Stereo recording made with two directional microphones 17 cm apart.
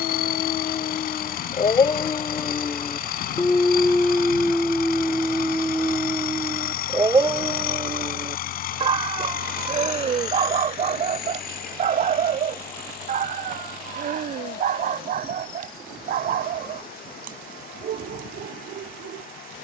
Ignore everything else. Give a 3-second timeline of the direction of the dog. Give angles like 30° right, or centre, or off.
30° left, centre, 20° right, 40° right, 50° right, 60° right, 60° right.